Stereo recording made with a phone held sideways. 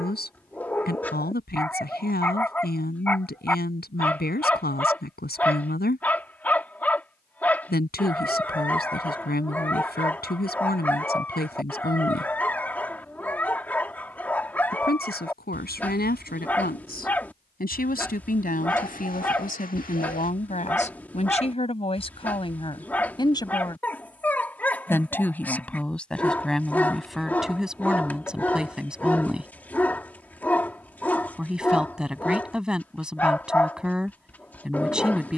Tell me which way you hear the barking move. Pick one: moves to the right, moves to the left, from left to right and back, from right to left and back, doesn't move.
doesn't move.